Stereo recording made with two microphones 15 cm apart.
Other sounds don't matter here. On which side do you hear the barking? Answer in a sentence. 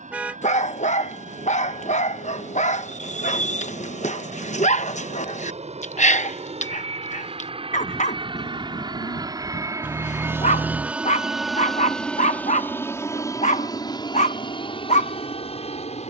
In this clip you hear the barking on the left.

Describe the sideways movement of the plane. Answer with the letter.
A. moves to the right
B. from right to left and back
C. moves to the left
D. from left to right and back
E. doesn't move
C.